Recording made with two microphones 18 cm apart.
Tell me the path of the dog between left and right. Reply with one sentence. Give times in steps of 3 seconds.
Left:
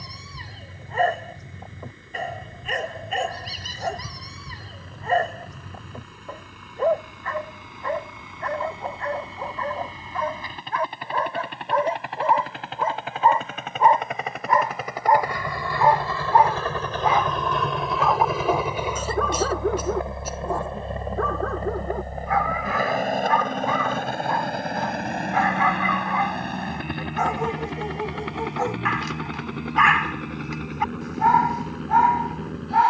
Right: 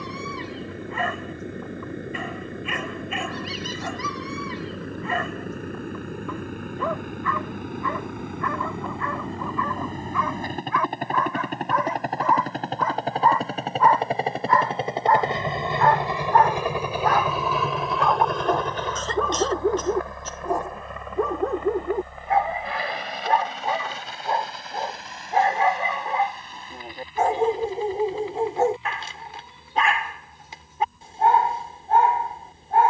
In this clip you hear the dog on the left from 0 s, in the centre from 15 s and on the right from 21 s.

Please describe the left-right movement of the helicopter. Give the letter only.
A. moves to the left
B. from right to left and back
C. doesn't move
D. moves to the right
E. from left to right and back
A.